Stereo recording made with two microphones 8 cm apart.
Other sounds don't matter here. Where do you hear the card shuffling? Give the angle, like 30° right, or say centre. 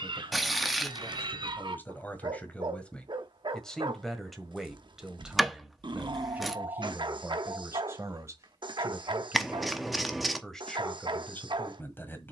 centre.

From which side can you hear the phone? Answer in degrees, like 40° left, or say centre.
70° right.